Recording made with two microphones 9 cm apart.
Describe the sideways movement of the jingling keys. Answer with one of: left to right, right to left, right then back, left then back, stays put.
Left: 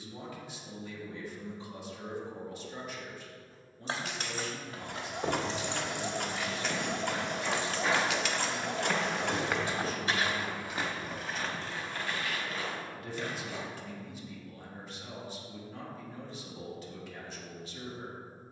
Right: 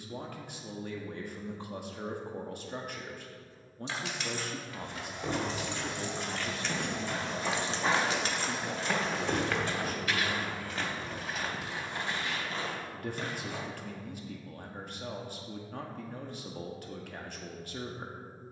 left to right.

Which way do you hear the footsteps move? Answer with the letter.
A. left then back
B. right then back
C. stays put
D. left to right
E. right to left
A.